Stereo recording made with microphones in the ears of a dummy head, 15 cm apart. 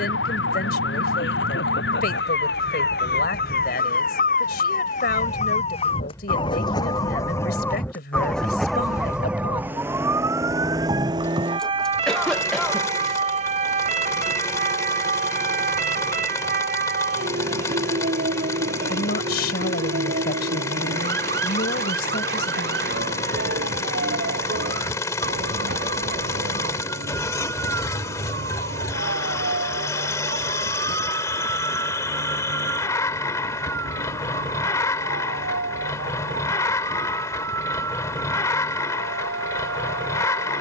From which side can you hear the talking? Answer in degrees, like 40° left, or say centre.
60° left.